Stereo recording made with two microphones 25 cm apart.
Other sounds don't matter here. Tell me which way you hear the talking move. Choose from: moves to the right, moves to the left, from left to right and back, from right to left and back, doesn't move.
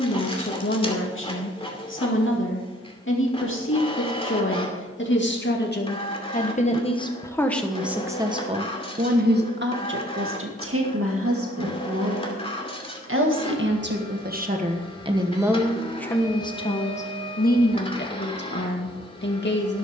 from left to right and back.